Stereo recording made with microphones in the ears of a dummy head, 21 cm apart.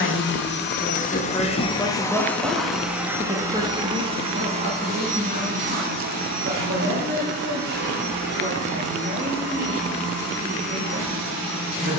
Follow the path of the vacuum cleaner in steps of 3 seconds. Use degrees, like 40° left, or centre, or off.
20° left, 30° right, 40° right, 50° right.